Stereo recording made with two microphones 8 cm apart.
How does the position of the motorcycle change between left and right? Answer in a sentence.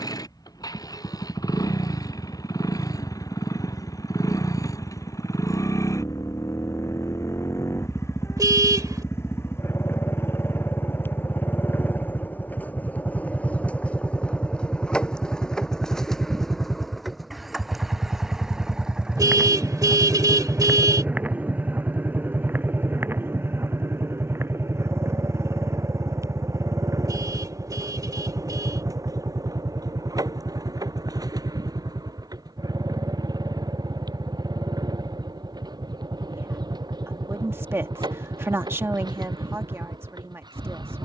You can hear the motorcycle move to the right.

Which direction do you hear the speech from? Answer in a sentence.
In this clip you hear the speech on the right.